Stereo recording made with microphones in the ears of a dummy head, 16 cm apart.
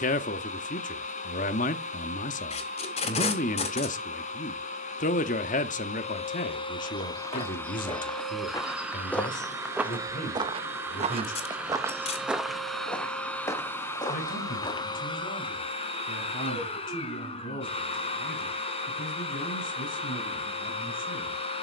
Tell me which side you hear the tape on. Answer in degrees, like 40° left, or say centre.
40° left.